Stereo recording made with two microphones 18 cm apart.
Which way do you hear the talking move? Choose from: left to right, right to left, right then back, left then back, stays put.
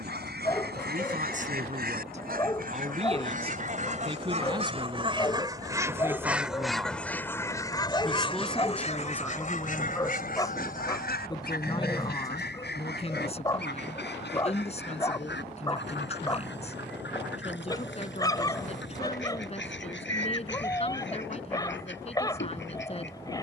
right to left.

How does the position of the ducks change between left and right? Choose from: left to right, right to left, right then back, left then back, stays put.
right to left.